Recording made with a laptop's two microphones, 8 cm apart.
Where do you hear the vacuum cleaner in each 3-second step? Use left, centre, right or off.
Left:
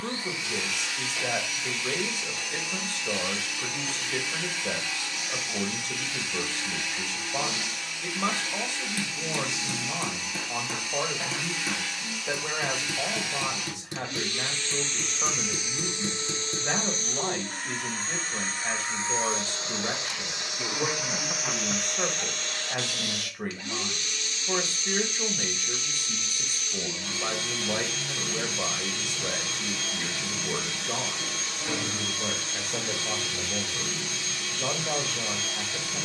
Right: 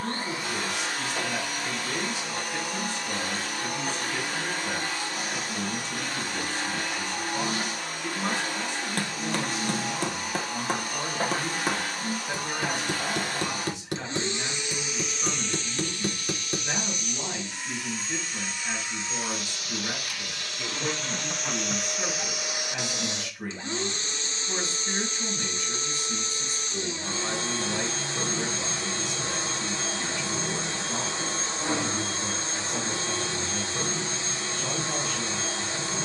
right, right, right, right, right, left, left, centre, right, right, right, right.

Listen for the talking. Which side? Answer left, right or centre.
left.